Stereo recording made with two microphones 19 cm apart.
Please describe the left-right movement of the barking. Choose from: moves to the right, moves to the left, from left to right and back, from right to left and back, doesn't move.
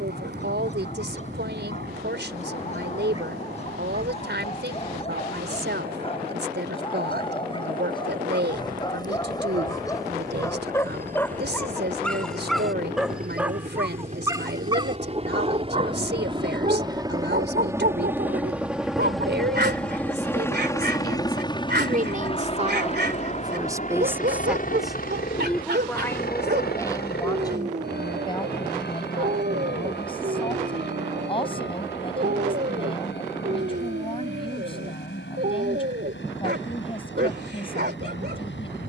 moves to the right.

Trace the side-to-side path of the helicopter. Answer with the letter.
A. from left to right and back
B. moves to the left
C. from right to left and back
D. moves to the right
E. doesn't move
B.